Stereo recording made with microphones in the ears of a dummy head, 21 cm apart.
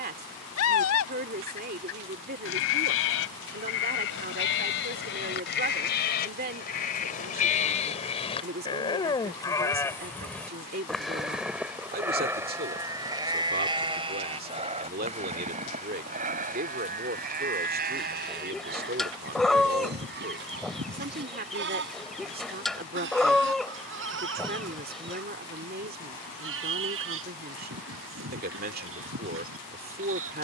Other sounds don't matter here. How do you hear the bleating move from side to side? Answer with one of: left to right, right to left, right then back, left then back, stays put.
left to right.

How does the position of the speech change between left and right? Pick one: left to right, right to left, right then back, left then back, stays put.
stays put.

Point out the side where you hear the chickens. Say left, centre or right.
centre.